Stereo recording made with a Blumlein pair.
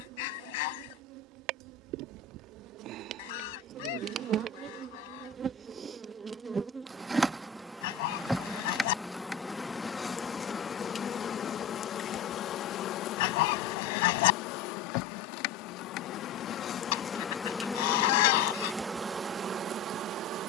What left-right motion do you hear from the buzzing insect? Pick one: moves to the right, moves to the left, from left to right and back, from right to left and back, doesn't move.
from right to left and back.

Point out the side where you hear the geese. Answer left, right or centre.
left.